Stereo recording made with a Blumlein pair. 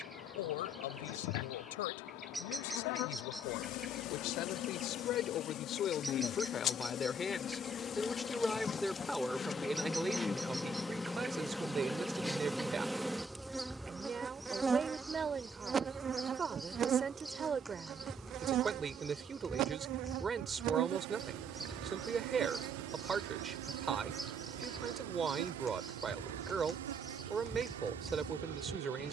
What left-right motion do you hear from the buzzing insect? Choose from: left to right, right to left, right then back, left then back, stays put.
left to right.